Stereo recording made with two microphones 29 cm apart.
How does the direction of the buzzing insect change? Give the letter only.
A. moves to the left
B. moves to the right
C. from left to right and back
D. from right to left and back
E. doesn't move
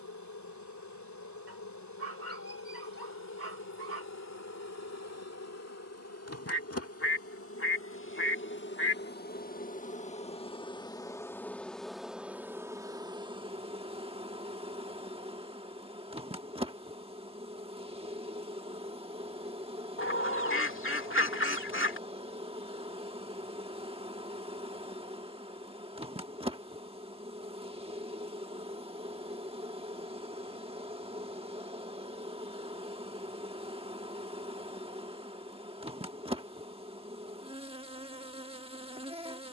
B.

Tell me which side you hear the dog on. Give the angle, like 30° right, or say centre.
50° right.